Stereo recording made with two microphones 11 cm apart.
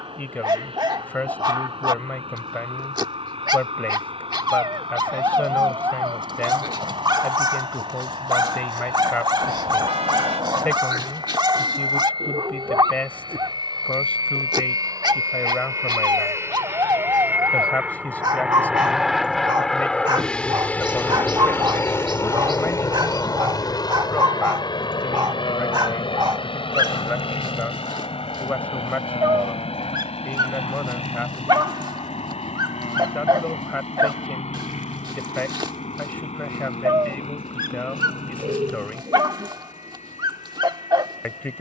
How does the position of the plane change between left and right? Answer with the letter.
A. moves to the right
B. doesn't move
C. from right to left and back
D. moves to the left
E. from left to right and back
D.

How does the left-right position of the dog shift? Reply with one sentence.
In this clip you hear the dog stay put.